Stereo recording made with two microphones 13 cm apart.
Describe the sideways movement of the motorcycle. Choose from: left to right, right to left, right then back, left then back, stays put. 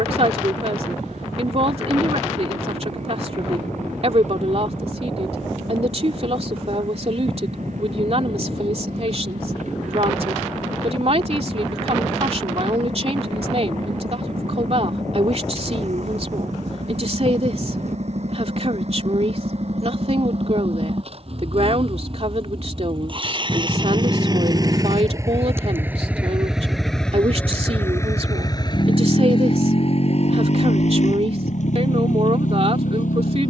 right to left.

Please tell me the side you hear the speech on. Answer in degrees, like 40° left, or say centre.
50° right.